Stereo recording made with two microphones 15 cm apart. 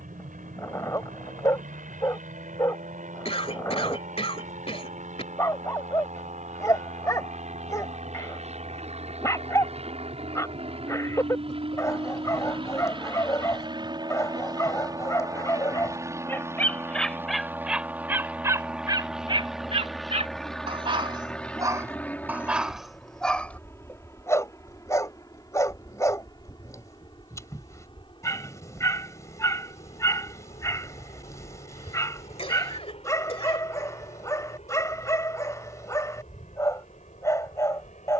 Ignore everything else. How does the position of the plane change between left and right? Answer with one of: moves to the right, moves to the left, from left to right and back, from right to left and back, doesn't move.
moves to the left.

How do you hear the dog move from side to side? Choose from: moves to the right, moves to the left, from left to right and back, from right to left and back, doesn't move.
from left to right and back.